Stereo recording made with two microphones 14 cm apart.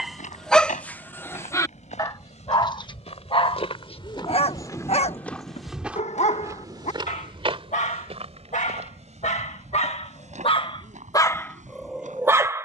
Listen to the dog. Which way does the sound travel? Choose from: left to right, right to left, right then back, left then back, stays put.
left then back.